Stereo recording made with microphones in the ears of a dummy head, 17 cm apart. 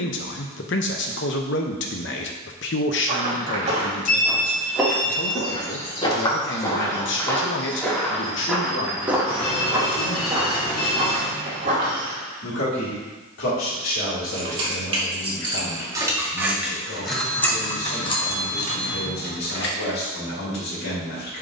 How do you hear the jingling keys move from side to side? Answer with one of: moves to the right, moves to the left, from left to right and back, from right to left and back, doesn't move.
moves to the left.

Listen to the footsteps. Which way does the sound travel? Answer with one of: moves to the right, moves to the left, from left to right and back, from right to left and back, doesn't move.
from right to left and back.